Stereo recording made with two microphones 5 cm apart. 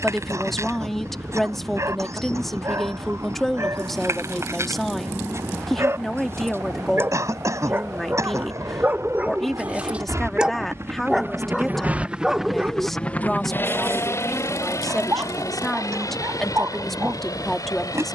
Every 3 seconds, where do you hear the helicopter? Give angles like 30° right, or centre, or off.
80° right, 80° right, 70° right, 50° right, 30° left, 70° left.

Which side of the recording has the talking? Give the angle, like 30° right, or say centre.
centre.